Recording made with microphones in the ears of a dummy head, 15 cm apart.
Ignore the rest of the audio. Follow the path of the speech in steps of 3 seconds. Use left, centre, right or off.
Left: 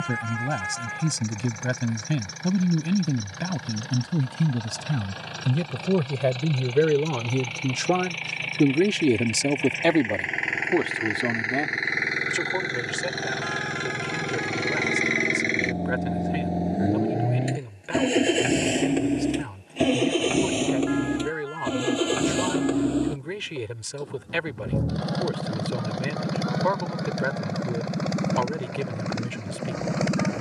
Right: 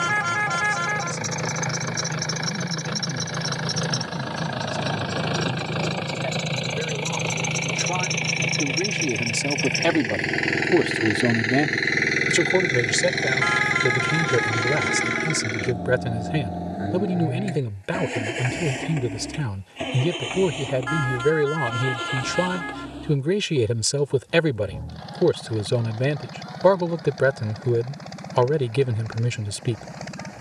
left, left, left, centre, right, right, right, right, right, right.